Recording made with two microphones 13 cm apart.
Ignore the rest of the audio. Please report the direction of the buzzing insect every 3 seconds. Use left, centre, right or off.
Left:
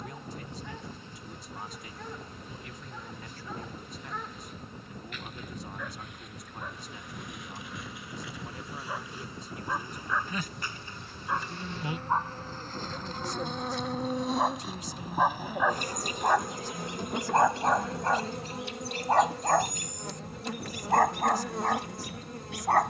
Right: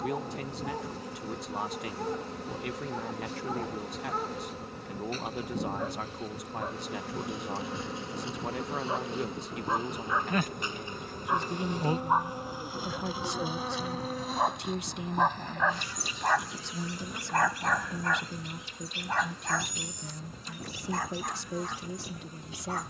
right, right, right, right, centre, left, left, left.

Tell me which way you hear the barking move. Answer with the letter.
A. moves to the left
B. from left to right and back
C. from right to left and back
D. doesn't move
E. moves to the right
A.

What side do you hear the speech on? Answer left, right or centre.
right.